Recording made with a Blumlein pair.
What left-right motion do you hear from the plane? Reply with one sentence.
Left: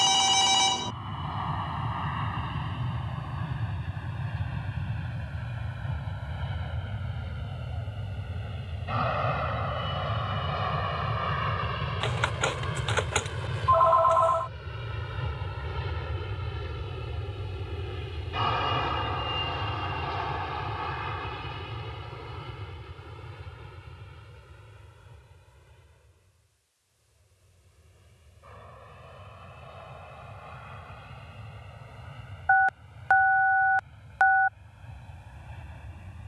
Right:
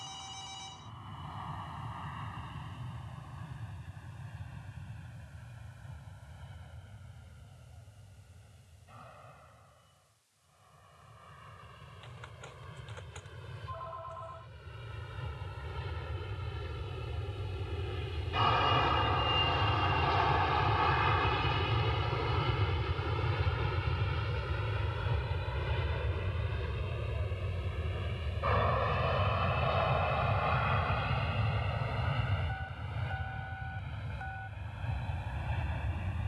In this clip you hear the plane move to the right.